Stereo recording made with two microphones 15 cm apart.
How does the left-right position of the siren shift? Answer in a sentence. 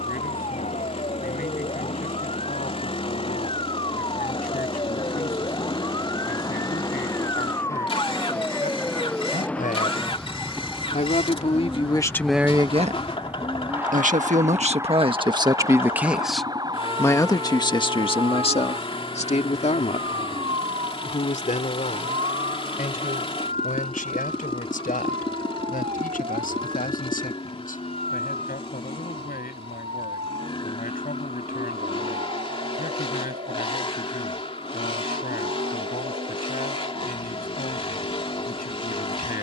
In this clip you hear the siren travel towards the right.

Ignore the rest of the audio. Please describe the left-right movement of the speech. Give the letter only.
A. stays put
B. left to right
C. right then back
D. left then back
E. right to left
C.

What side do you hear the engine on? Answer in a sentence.
In this clip you hear the engine on the left.